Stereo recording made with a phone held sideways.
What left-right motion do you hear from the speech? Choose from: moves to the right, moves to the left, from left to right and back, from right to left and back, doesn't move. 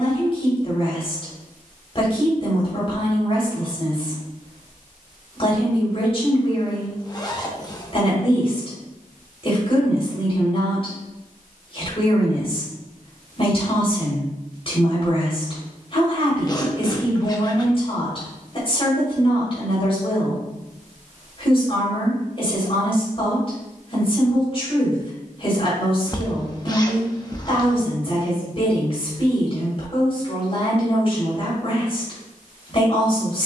doesn't move.